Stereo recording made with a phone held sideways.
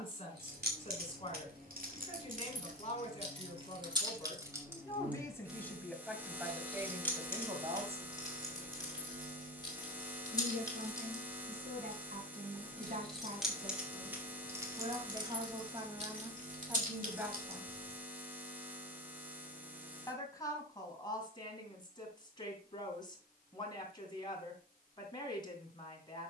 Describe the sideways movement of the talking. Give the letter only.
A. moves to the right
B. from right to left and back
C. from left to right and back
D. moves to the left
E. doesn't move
C.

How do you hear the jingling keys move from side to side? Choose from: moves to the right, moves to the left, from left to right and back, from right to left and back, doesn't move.
from right to left and back.